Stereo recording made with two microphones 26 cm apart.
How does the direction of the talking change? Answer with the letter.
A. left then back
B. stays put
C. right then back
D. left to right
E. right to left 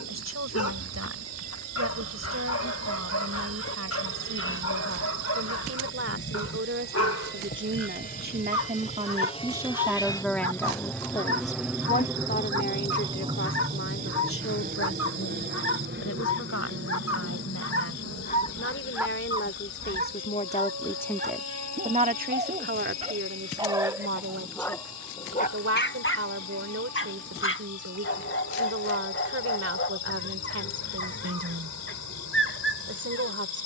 A.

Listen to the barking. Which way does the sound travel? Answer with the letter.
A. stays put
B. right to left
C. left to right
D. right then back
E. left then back
D.